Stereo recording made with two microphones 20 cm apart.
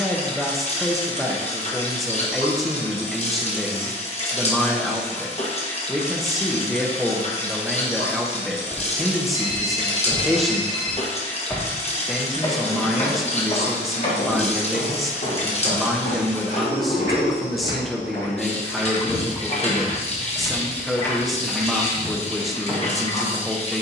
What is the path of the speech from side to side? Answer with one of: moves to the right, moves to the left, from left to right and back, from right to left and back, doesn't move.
doesn't move.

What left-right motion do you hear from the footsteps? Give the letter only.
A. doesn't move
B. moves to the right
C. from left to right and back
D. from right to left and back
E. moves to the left
D.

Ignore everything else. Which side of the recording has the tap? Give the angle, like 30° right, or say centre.
30° left.